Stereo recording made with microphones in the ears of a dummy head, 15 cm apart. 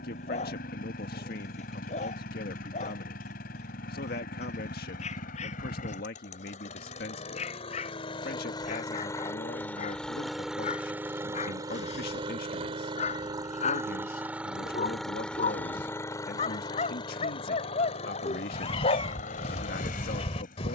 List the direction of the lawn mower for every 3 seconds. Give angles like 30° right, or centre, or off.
60° left, 50° left, 40° left, centre, 20° right, 20° left, 50° left.